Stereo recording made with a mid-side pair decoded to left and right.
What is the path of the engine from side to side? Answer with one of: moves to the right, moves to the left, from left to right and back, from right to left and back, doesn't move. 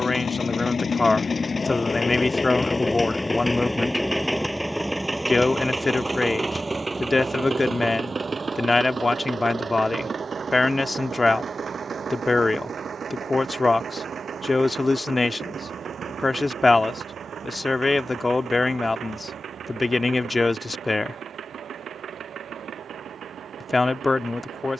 moves to the right.